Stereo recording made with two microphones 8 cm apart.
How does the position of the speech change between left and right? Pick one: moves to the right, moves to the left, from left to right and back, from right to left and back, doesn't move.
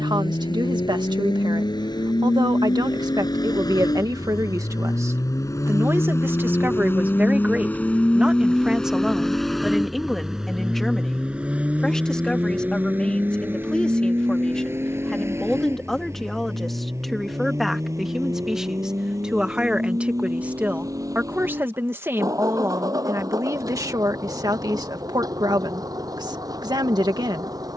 from right to left and back.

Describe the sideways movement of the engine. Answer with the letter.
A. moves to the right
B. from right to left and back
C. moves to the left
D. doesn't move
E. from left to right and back
A.